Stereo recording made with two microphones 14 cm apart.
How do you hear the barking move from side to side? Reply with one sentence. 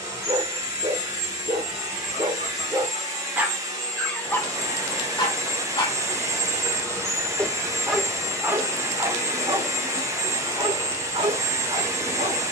You can hear the barking move from right to left and back again.